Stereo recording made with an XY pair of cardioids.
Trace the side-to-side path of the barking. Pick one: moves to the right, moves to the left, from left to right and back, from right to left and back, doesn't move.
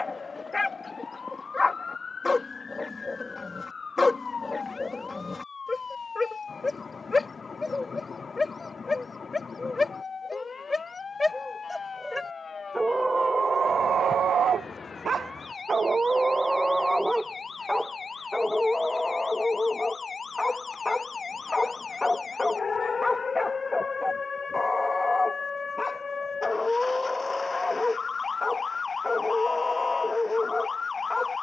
from left to right and back.